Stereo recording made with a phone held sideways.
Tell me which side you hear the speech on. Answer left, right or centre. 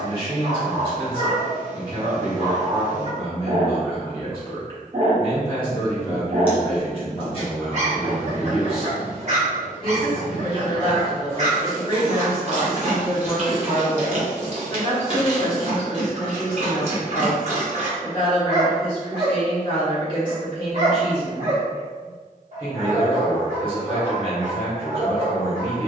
left.